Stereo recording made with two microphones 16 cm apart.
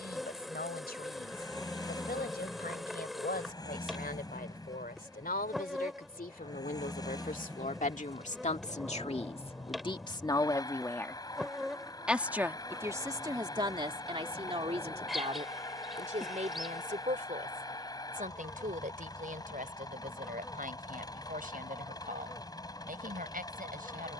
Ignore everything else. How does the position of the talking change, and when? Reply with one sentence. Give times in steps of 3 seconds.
In this clip you hear the talking on the left from 0 s and on the right from 12 s.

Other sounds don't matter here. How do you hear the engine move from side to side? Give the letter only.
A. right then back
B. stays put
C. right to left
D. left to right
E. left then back
B.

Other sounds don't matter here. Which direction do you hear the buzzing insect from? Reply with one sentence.
You can hear the buzzing insect in the centre.